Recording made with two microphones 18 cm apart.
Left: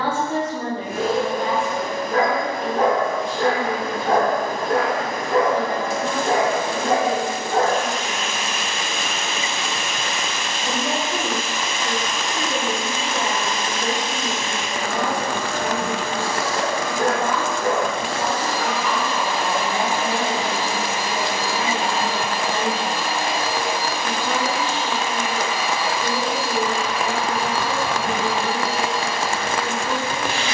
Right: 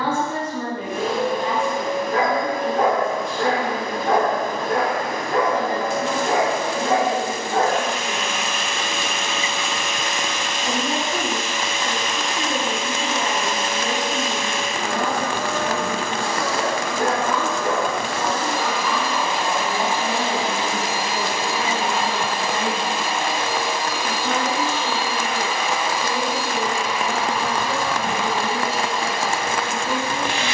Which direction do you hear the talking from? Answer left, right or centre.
left.